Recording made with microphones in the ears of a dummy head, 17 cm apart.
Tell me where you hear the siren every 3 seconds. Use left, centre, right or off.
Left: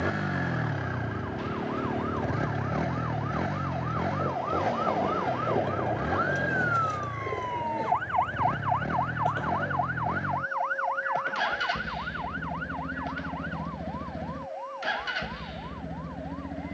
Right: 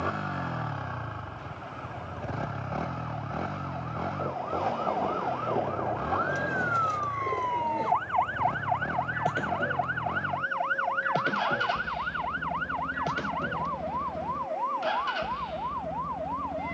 left, left, centre, right, right, right.